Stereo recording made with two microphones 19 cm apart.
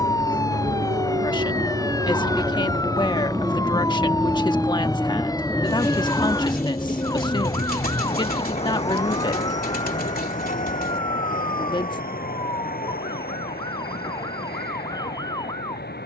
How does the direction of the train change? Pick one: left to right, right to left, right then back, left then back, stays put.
right to left.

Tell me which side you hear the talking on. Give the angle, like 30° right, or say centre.
20° left.